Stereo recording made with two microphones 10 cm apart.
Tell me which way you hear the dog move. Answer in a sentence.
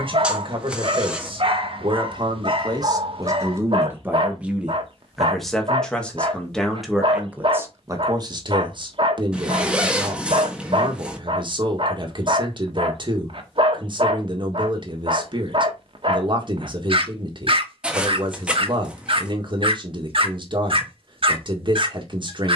In this clip you hear the dog stay put.